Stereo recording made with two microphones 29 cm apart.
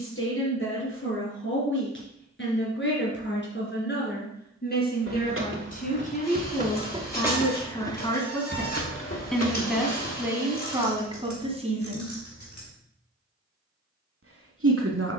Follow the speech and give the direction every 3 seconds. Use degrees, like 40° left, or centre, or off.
50° left, 40° left, 20° left, 10° right, 50° right.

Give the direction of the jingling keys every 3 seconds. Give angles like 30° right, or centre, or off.
off, 50° right, centre, 70° left, 80° left.